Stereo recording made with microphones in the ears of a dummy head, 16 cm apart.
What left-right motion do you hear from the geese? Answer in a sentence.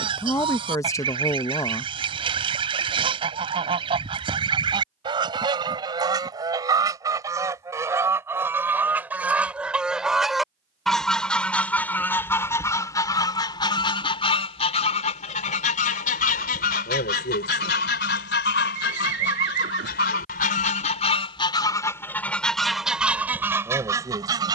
In this clip you hear the geese move from right to left and back again.